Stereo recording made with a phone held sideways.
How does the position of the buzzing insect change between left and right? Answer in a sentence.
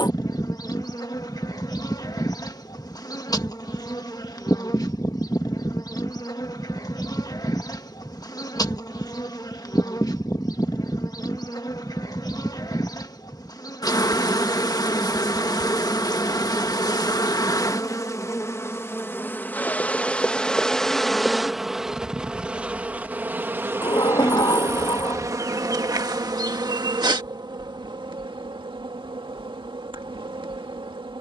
You can hear the buzzing insect move from left to right.